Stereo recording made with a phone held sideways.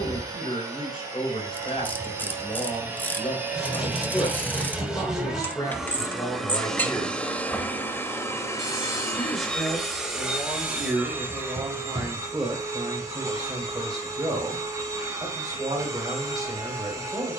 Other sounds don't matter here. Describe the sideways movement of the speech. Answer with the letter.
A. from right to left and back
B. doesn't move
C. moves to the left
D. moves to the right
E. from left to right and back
D.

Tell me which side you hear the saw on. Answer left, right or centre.
centre.